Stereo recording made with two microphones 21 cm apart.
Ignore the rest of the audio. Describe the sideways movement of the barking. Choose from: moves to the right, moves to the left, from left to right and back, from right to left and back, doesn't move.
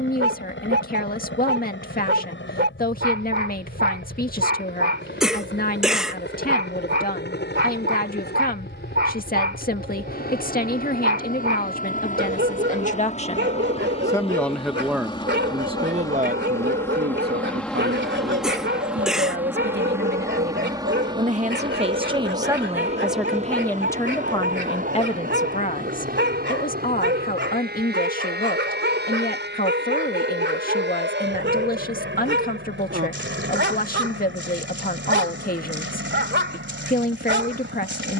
doesn't move.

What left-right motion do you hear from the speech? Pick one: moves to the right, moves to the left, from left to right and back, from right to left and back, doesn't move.
from left to right and back.